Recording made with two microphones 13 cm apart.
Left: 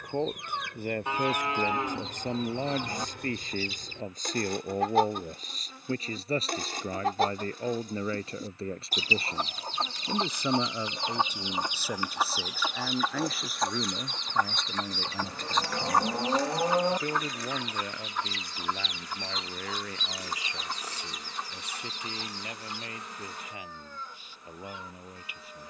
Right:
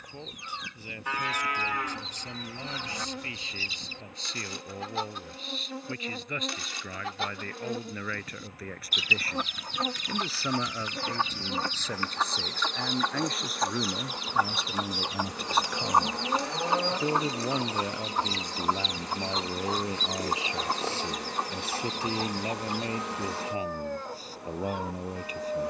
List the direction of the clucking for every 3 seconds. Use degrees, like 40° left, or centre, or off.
60° left, 50° left, 40° left, 30° left, centre, 30° right, 40° right, 60° right, 60° right.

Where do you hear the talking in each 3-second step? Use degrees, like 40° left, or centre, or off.
50° left, 40° left, 30° left, 20° left, centre, 10° right, 20° right, 30° right, 40° right.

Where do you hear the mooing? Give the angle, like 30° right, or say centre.
20° left.